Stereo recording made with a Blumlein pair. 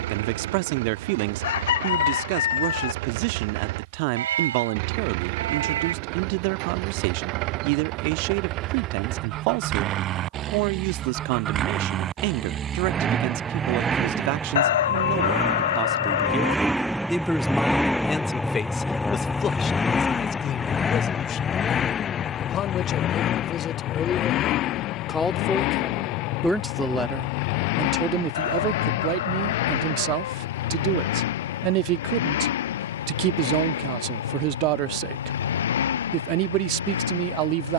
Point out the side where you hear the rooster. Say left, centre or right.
left.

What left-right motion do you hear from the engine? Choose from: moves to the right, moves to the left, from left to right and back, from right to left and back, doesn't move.
moves to the left.